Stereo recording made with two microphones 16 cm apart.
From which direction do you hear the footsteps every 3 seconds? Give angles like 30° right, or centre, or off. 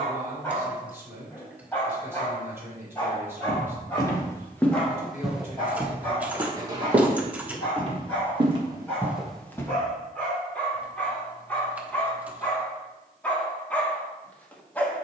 off, 10° left, 30° right, 10° left, off.